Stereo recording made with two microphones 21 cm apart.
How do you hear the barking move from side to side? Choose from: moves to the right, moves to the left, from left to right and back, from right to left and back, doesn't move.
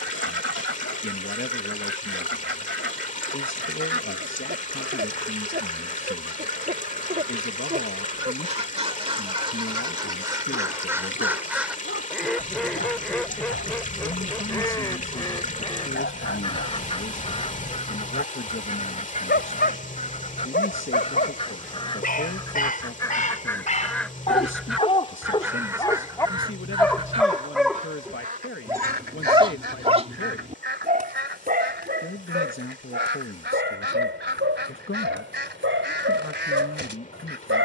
moves to the right.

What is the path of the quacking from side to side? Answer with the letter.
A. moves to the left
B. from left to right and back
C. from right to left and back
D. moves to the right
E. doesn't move
C.